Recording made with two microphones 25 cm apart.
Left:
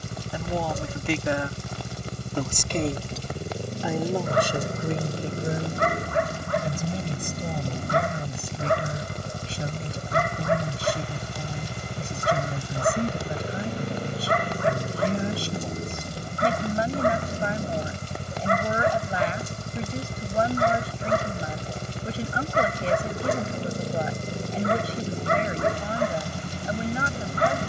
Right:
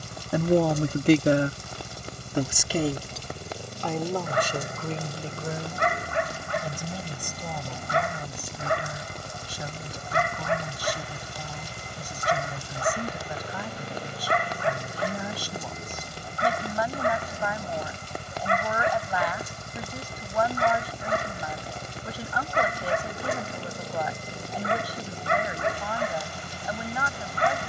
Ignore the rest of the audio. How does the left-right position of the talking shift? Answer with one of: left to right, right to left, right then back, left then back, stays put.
right to left.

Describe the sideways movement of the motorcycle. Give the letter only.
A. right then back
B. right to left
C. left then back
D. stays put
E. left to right
D.